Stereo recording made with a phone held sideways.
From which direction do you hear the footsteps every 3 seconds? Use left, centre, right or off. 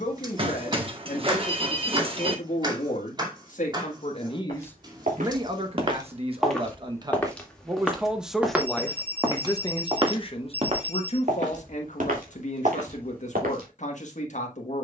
off, right, centre, right, right.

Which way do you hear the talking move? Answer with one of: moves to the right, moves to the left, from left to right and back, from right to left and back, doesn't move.
from left to right and back.